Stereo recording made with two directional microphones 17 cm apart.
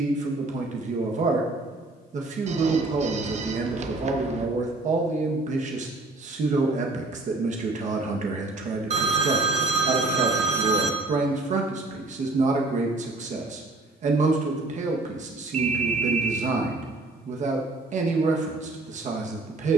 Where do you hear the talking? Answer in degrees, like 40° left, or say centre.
50° right.